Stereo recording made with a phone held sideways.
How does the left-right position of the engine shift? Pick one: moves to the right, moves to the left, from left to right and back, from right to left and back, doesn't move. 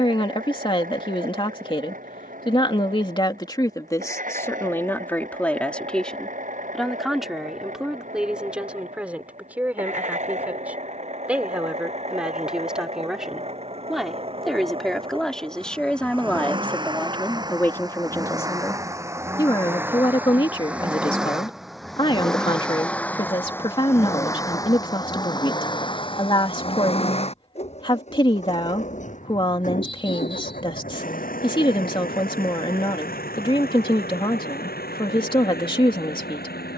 moves to the left.